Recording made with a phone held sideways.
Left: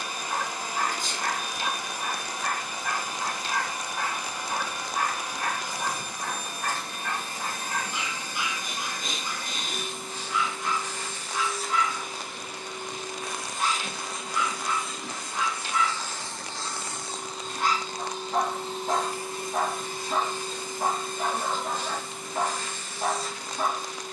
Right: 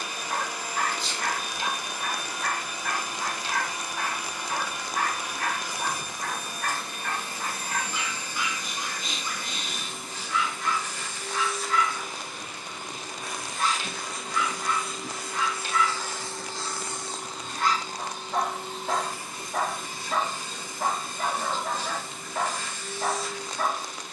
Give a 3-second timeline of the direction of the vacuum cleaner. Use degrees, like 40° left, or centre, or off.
50° left, 50° left, 50° left, 40° left, 20° left, centre, 40° left, 50° left.